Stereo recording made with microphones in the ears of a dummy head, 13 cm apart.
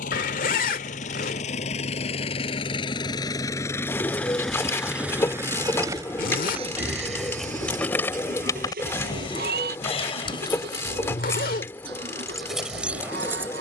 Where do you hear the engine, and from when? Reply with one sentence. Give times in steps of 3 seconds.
In this clip you hear the engine on the left from 0 s, in the centre from 3 s and on the right from 6 s.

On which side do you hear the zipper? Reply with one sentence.
You can hear the zipper on the left.